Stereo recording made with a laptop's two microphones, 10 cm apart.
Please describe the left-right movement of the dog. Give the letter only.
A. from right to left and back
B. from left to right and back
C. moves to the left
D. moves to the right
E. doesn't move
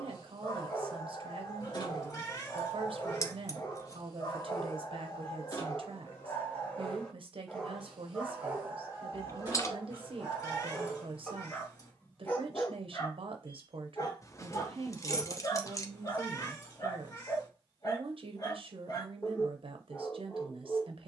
B.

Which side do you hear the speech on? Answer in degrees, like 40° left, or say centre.
60° right.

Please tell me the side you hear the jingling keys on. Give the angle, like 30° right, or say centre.
30° left.